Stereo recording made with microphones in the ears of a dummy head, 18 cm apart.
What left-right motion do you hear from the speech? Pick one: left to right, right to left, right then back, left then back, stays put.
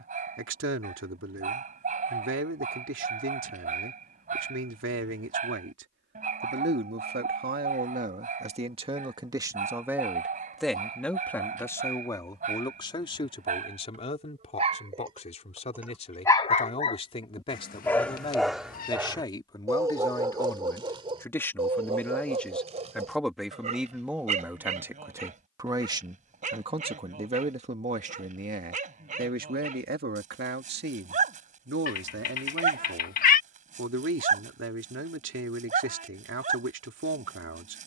left then back.